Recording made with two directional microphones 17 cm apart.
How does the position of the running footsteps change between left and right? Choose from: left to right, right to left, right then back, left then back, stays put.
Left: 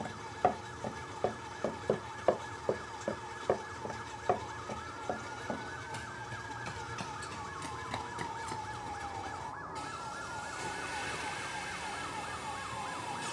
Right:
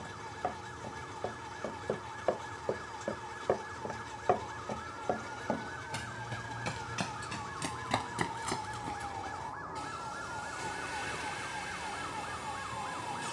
left to right.